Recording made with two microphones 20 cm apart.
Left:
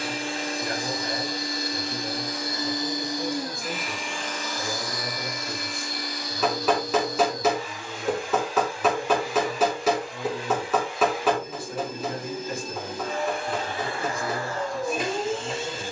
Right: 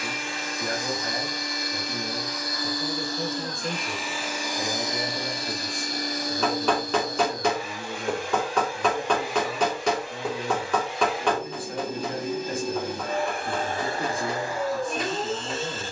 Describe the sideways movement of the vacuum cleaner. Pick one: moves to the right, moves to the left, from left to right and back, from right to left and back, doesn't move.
from left to right and back.